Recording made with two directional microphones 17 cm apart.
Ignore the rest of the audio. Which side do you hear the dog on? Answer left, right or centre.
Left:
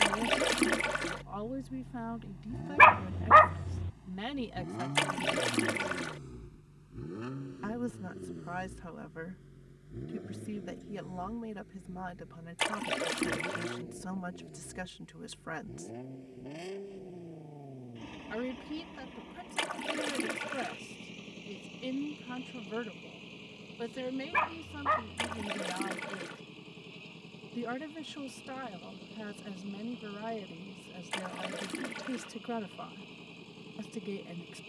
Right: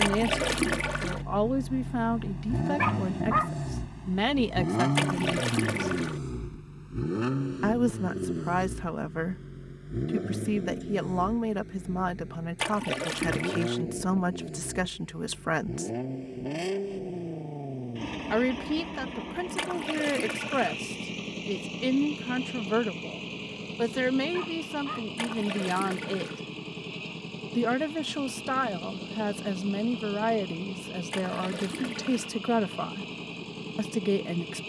left.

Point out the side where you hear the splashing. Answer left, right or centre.
centre.